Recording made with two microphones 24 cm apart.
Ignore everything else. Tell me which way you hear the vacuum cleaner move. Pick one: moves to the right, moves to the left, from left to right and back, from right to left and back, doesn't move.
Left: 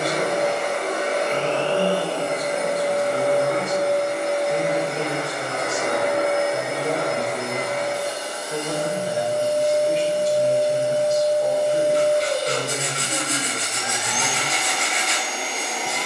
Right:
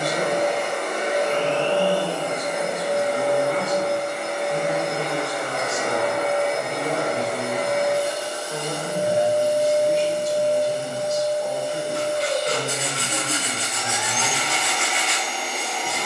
from left to right and back.